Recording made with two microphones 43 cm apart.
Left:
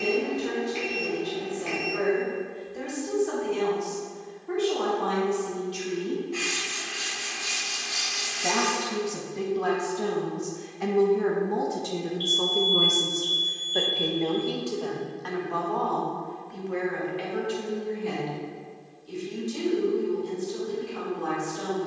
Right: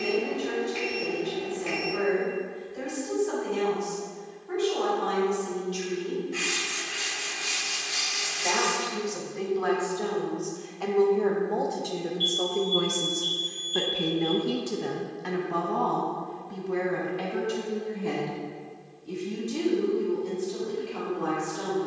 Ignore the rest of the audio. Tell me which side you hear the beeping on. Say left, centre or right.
right.